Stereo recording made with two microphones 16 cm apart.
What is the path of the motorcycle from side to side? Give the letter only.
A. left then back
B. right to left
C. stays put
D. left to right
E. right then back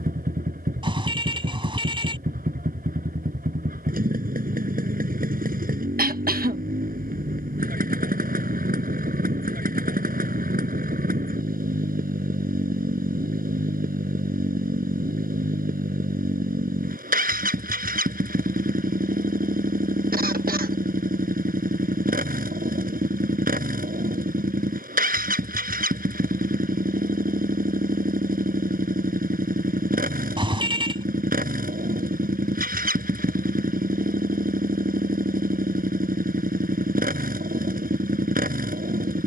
C.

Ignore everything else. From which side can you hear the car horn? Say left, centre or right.
right.